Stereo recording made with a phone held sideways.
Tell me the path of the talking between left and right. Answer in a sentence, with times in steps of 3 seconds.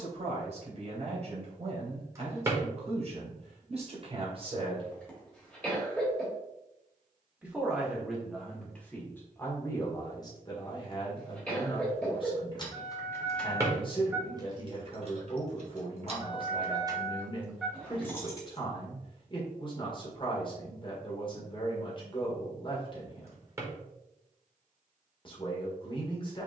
You can hear the talking on the right from 0 s, in the centre from 6 s and on the left from 9 s.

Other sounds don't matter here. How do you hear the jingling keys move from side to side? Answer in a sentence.
In this clip you hear the jingling keys move from left to right and back again.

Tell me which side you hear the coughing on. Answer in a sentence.
You can hear the coughing in the centre.